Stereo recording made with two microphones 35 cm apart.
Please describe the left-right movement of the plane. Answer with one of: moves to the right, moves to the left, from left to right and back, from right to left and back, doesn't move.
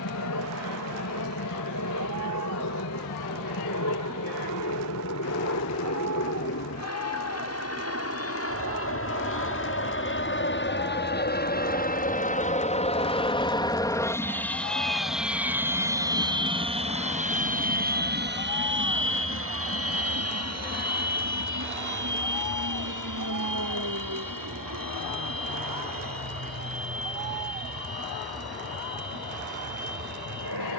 moves to the right.